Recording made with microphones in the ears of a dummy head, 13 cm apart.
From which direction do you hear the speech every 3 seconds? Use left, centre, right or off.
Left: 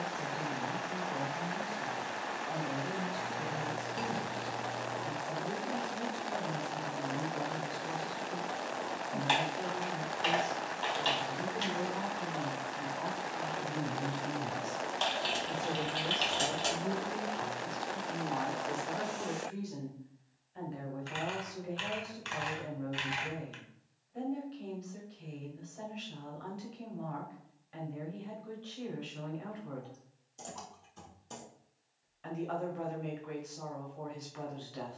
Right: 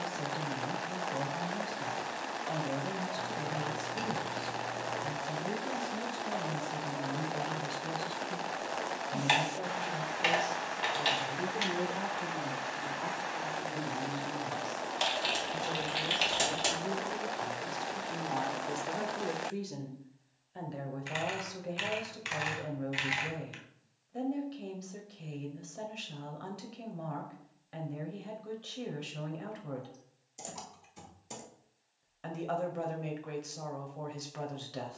right, right, right, right, centre, centre, right, right, right, right, right, right.